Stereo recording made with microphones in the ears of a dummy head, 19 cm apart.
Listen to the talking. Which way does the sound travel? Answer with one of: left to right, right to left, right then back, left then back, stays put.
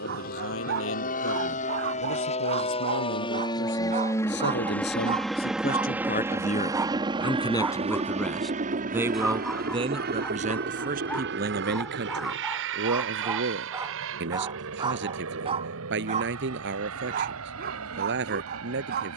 left to right.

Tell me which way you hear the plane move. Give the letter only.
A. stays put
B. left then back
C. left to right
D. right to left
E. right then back
C.